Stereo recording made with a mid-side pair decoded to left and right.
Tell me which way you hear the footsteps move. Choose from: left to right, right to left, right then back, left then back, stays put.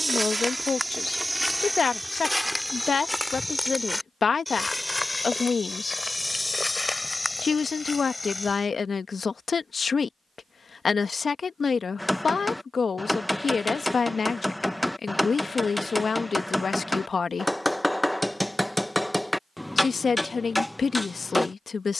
right to left.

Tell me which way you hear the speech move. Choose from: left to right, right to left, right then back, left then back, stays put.
stays put.